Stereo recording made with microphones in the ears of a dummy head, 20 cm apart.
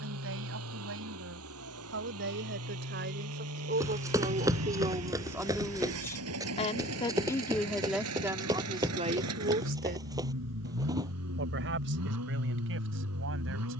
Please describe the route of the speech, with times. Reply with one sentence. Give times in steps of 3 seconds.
In this clip you hear the speech on the right from 0 s, in the centre from 6 s and on the right from 9 s.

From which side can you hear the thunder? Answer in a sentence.
In this clip you hear the thunder on the right.